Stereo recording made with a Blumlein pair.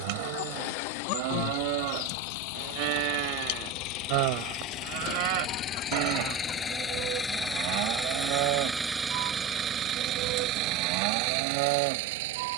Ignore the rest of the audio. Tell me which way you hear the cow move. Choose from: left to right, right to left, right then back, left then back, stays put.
stays put.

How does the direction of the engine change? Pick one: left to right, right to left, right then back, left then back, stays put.
left to right.